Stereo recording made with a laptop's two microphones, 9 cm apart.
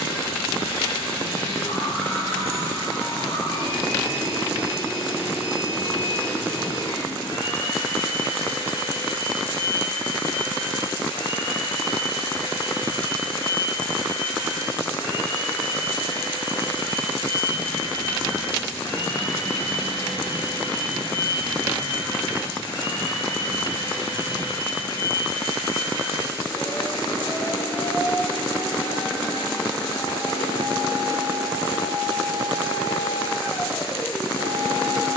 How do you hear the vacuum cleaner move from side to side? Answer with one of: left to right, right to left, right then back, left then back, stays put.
stays put.